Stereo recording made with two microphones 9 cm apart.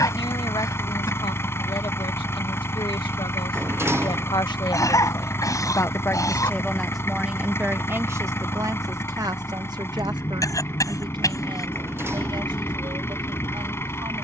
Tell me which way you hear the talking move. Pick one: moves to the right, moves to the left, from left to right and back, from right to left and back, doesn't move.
moves to the right.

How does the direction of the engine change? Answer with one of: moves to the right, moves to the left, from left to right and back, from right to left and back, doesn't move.
doesn't move.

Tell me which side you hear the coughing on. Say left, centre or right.
left.